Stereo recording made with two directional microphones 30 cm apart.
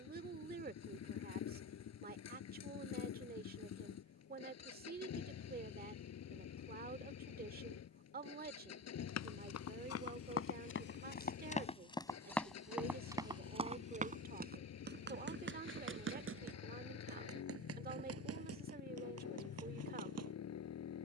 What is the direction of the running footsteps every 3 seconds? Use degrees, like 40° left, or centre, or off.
off, off, off, 40° left, 10° right, 50° right, 60° right.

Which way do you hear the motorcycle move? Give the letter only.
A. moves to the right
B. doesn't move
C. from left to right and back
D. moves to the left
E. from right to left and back
B.